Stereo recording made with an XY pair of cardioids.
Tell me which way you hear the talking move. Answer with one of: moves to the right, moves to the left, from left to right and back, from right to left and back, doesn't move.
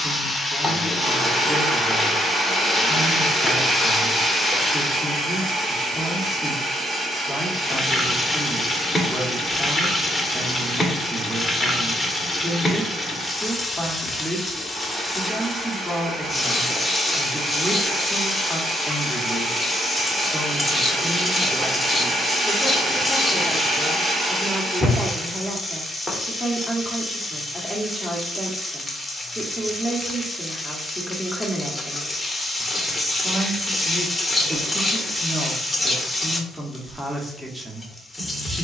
doesn't move.